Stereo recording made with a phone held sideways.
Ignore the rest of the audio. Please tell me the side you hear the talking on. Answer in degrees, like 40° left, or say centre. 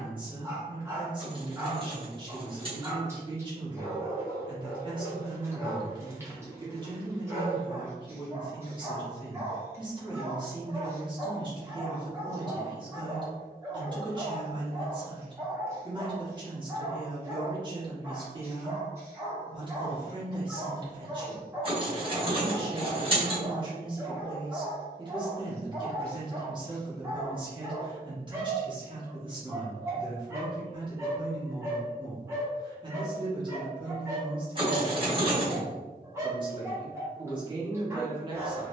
30° right.